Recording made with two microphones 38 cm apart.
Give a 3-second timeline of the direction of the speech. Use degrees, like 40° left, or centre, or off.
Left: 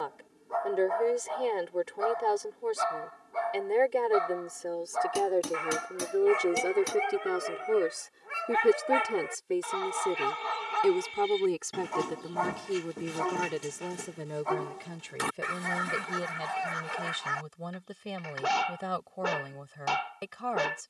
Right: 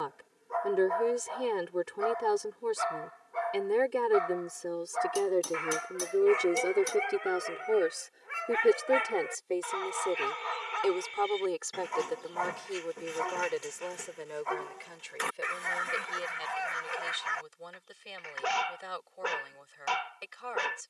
20° right, 20° right, 10° left, 30° left, 50° left, 60° left, 70° left.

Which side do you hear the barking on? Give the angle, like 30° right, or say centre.
50° left.